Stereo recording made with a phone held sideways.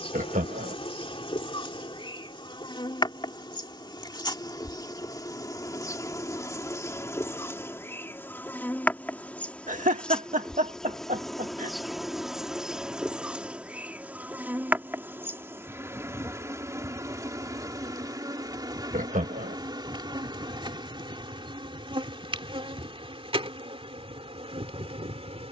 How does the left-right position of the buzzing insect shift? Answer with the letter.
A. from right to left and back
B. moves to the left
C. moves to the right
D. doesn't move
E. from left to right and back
C.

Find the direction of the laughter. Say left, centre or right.
right.